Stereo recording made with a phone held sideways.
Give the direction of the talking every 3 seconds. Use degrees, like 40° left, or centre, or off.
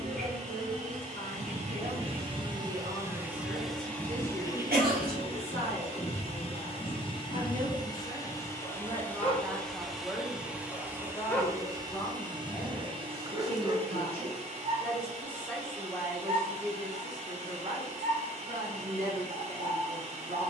70° right, 70° right, 40° right, centre, 30° left, 10° right, 60° right.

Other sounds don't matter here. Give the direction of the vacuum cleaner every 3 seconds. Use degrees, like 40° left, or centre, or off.
40° right, 20° left, 30° left, 10° right, 40° right, 50° right, 50° right.